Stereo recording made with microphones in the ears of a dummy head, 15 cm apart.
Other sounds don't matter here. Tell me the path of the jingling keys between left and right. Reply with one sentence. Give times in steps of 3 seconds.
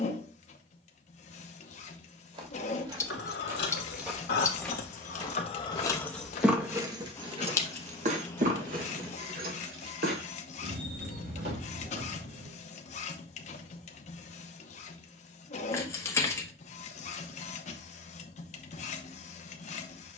You can hear the jingling keys not at all from 0 s, on the left from 3 s, on the right from 6 s and not at all from 15 s.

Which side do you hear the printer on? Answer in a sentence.
You can hear the printer on the left.